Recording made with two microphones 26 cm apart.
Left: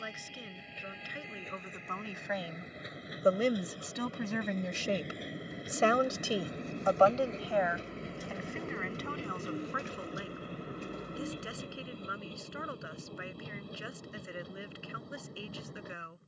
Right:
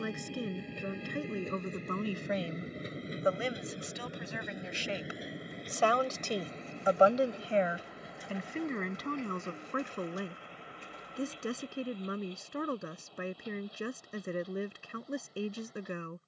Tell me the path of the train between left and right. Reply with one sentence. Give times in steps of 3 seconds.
In this clip you hear the train on the right from 0 s, in the centre from 3 s and on the left from 6 s.